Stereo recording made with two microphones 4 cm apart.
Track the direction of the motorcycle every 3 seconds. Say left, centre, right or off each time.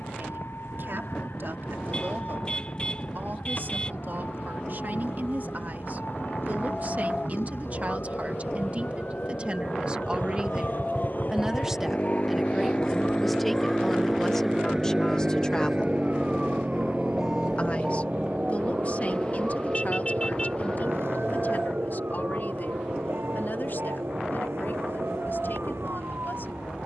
left, left, left, left, centre, right, right, right, right.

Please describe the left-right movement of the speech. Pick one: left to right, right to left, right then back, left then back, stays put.
right to left.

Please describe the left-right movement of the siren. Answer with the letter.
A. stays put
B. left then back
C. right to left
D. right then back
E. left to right
E.